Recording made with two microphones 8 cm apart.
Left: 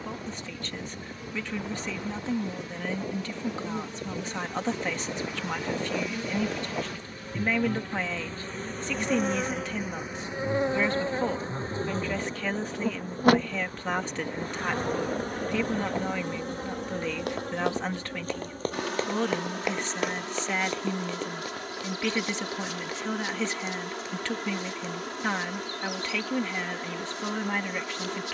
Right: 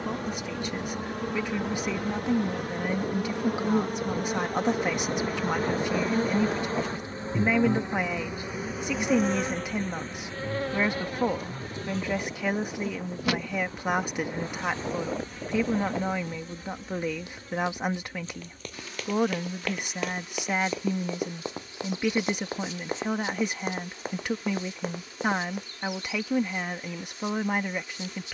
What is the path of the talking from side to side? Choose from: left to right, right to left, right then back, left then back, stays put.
stays put.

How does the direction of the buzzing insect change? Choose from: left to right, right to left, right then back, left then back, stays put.
right to left.